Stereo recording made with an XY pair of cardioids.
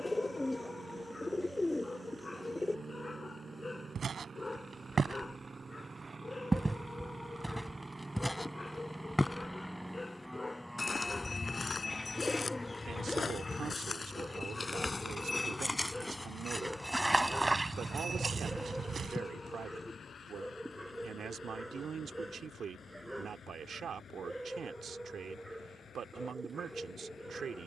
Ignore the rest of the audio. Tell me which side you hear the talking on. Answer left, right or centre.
right.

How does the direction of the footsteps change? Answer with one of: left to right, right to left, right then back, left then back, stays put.
left then back.